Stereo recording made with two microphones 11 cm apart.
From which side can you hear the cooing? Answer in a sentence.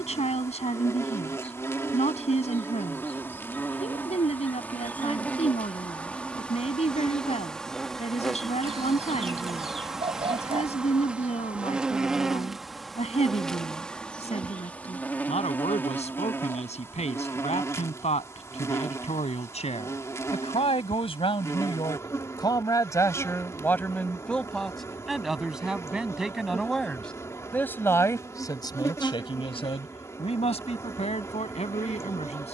You can hear the cooing on the right.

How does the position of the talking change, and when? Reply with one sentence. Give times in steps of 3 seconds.
You can hear the talking on the left from 0 s, in the centre from 24 s and on the left from 27 s.